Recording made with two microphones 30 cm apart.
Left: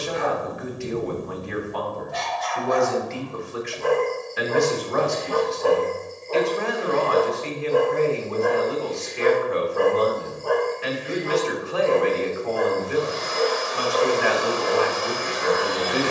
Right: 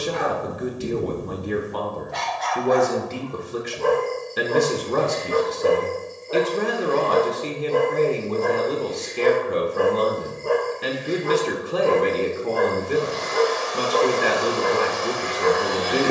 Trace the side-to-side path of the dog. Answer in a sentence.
In this clip you hear the dog go left and come back.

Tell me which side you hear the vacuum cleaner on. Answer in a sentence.
You can hear the vacuum cleaner on the right.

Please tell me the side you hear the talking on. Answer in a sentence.
You can hear the talking on the right.